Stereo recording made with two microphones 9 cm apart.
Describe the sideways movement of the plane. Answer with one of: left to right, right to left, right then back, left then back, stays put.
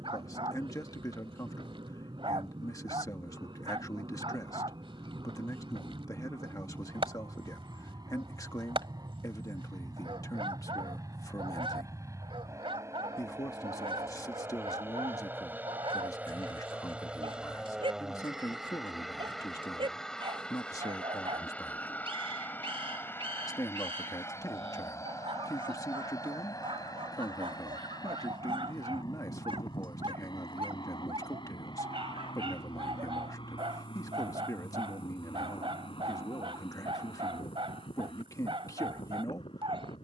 right to left.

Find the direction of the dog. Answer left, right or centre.
right.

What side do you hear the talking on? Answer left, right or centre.
left.